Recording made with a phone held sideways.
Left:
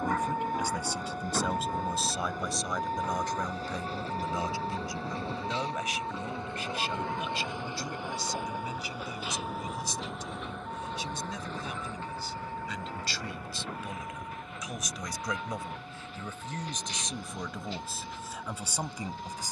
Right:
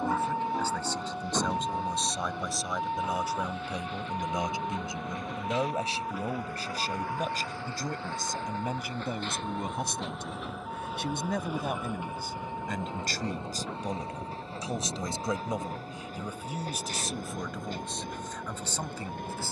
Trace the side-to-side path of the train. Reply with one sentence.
You can hear the train move from left to right.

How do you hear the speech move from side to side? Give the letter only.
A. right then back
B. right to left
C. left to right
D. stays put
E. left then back
A.